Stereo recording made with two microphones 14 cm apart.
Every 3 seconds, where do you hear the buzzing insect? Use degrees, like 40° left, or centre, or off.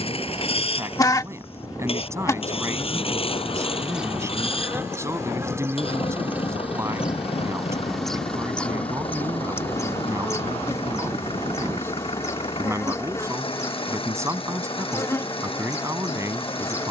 20° left, 20° right, centre, 20° left, 20° left, 20° left.